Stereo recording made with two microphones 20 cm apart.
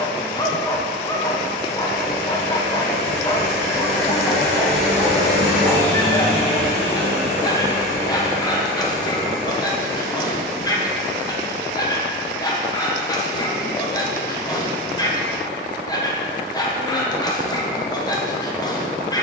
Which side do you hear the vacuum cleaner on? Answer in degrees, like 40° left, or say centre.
10° left.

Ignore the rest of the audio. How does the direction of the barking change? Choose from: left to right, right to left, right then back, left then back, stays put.
stays put.